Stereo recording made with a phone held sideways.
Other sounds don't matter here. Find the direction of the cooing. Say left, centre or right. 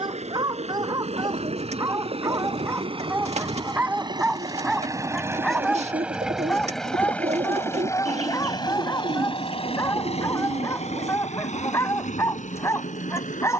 right.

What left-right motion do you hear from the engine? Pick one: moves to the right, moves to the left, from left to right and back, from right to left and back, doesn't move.
moves to the left.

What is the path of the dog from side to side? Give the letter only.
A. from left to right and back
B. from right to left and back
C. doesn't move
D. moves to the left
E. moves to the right
D.